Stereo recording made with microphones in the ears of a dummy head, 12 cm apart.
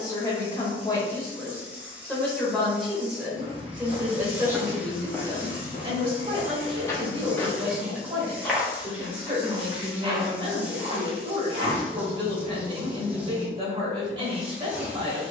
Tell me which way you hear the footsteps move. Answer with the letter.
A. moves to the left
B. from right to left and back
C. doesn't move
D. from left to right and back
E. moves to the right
B.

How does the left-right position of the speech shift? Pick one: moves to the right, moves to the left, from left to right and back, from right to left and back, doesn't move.
moves to the right.